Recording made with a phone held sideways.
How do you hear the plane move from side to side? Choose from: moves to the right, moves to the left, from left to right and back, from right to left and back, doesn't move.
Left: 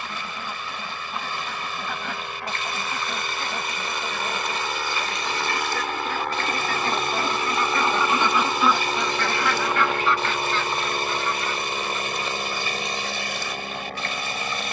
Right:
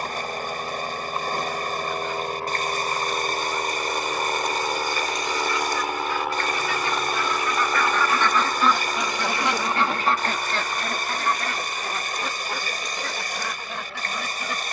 moves to the left.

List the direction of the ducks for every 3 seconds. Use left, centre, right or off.
left, left, left, right, right.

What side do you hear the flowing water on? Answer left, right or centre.
right.